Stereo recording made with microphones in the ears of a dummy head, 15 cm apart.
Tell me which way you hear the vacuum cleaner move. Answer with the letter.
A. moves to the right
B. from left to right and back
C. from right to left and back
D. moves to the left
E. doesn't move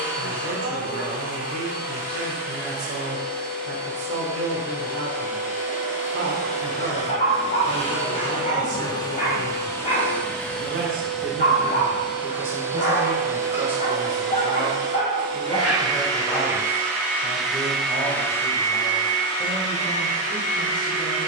B.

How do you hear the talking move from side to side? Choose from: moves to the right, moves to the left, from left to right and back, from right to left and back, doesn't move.
moves to the left.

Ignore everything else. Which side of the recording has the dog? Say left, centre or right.
left.